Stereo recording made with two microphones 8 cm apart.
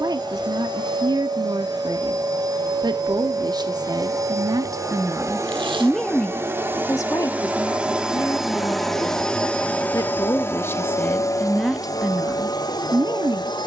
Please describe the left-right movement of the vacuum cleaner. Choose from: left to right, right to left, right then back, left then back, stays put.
right to left.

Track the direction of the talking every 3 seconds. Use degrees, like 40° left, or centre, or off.
50° right, 40° right, 40° left, 20° left, 30° right.